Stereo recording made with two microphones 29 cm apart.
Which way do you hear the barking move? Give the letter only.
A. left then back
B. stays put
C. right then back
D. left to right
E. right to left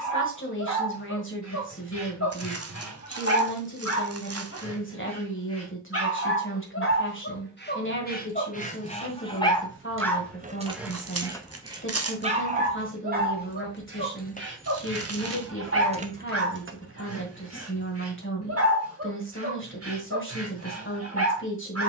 D.